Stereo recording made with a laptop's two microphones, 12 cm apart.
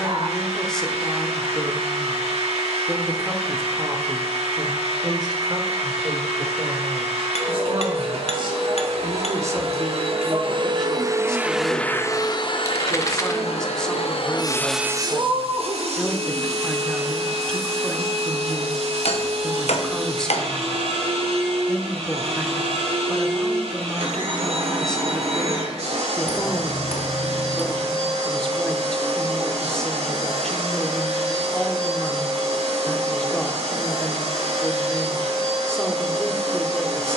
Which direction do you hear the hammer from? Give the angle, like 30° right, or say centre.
70° left.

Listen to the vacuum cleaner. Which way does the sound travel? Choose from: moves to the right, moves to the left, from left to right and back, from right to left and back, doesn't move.
from right to left and back.